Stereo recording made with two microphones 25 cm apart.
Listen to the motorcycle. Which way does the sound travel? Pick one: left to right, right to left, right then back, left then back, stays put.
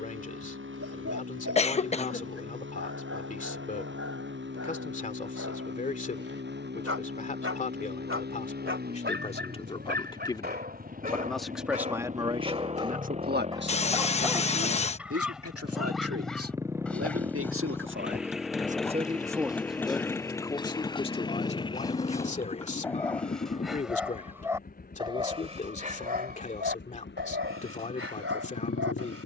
right to left.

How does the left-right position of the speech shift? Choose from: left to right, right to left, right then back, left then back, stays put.
right then back.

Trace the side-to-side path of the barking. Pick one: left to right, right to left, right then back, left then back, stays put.
left then back.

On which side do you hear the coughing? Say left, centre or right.
left.